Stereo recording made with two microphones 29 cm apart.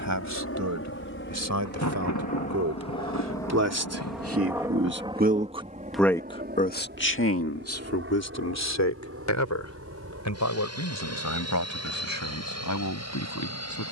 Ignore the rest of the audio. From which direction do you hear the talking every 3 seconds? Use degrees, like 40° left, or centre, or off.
80° right, 50° right, 50° left, 70° left, 80° left.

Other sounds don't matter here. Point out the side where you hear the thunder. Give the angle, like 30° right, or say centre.
70° left.